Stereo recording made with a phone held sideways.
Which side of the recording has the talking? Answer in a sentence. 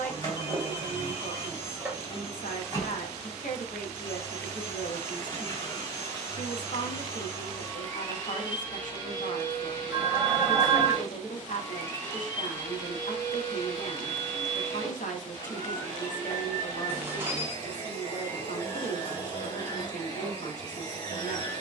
You can hear the talking on the left.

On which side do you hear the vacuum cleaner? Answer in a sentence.
You can hear the vacuum cleaner on the left.